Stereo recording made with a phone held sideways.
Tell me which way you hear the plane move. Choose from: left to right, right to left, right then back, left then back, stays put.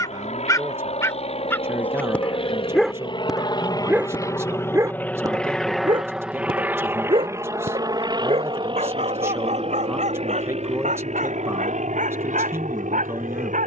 left to right.